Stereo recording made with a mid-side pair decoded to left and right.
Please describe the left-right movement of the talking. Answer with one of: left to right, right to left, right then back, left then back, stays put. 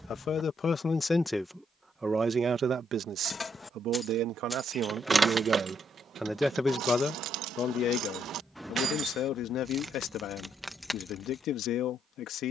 right then back.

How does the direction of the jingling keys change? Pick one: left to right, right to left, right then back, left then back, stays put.
right then back.